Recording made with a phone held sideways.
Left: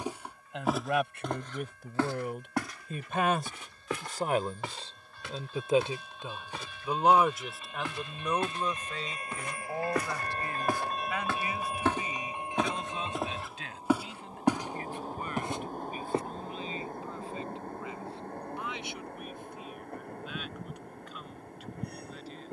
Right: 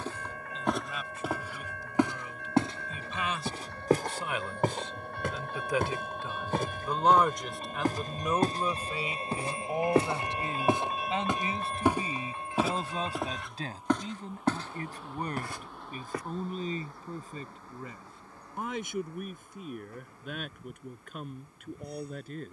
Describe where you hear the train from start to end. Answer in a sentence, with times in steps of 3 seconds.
In this clip you hear the train on the right from 0 s, in the centre from 9 s and on the left from 12 s.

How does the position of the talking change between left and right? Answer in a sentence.
In this clip you hear the talking move from left to right.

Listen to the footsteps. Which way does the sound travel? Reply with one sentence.
In this clip you hear the footsteps move from left to right and back again.